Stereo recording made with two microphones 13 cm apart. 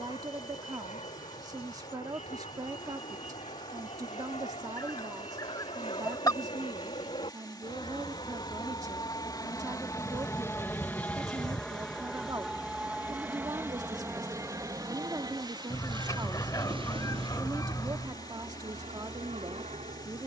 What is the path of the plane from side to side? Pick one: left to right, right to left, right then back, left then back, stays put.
left to right.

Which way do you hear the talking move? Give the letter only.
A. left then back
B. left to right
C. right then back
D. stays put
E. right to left
D.